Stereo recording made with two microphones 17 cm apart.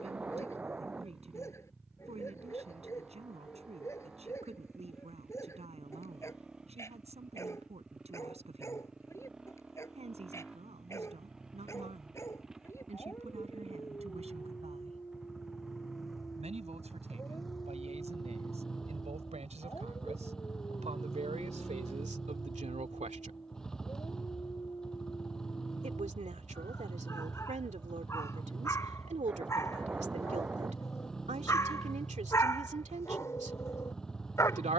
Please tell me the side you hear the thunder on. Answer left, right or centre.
centre.